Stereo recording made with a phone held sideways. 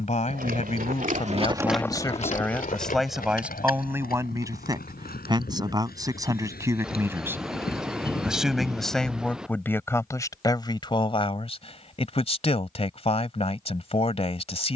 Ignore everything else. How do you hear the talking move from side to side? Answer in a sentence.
In this clip you hear the talking move from left to right and back again.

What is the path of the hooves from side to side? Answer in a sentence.
You can hear the hooves move to the left.